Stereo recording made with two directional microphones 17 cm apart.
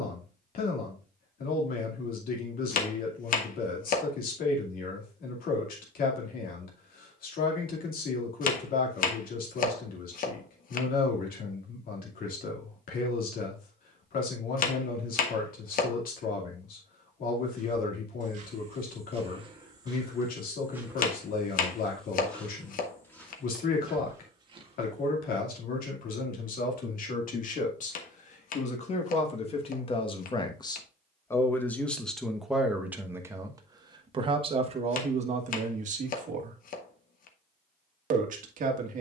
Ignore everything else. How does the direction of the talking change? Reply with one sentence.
In this clip you hear the talking move to the right.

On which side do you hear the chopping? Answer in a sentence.
You can hear the chopping on the left.